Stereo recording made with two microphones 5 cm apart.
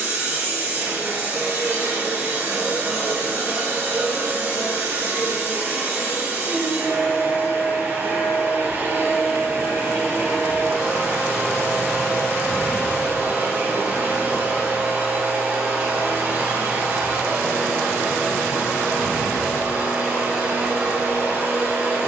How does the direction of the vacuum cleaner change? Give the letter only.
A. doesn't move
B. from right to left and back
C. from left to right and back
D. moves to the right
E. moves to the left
A.